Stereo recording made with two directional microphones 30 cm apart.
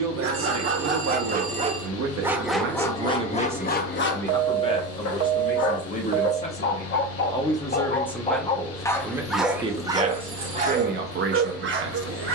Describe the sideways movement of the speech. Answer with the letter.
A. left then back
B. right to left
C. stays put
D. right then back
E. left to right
A.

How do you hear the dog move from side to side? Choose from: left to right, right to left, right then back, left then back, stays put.
left then back.